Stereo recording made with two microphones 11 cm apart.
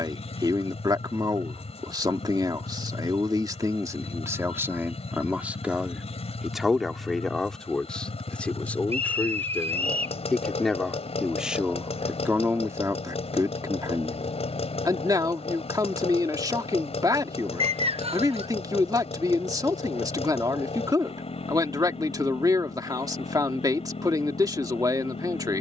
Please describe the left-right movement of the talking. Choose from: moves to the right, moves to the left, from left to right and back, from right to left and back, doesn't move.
from right to left and back.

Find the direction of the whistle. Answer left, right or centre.
right.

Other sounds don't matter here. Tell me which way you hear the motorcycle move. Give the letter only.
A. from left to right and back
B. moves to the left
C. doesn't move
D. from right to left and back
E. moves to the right
C.